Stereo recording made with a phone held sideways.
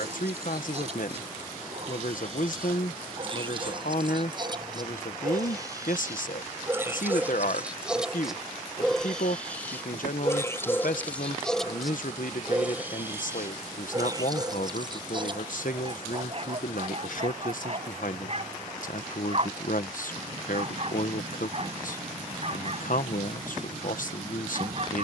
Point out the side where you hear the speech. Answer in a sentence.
You can hear the speech on the left.